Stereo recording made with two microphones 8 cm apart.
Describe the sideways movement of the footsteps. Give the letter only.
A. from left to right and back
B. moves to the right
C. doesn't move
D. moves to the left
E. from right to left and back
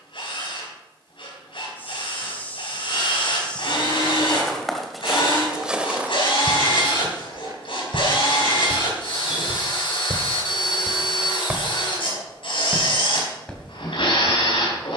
A.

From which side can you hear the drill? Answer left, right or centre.
left.